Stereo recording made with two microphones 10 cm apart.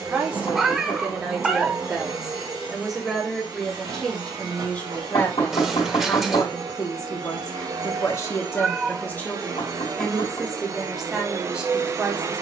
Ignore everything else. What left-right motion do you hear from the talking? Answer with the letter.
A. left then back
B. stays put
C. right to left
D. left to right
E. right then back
A.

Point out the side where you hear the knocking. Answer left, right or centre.
left.